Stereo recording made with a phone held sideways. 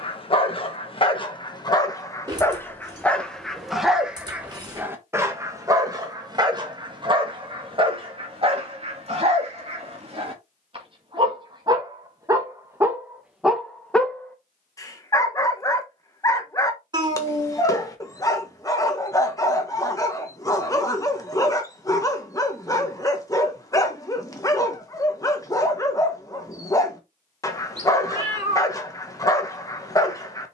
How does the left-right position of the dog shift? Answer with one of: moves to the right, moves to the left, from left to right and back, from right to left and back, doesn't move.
from left to right and back.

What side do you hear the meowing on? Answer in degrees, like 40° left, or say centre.
30° right.